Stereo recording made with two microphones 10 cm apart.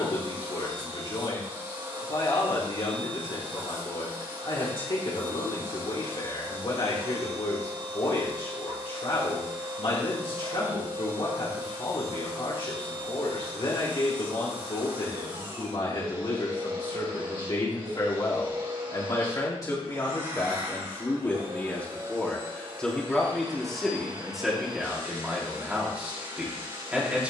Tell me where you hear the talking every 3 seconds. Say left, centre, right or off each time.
left, left, left, left, left, left, left, centre, centre.